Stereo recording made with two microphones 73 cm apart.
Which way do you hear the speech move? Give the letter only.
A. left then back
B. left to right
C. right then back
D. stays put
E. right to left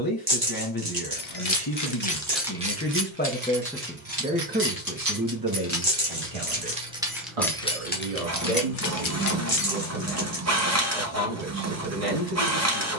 B.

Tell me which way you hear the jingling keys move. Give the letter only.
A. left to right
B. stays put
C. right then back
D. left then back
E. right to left
C.